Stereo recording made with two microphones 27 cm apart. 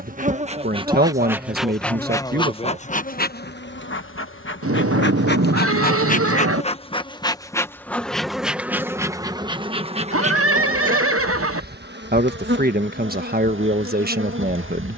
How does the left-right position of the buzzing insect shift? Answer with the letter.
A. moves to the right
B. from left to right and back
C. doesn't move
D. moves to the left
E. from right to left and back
E.